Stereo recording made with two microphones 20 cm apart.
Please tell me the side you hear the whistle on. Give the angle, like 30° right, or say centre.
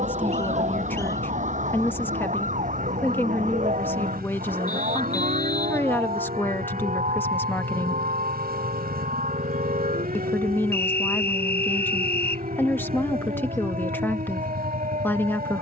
60° left.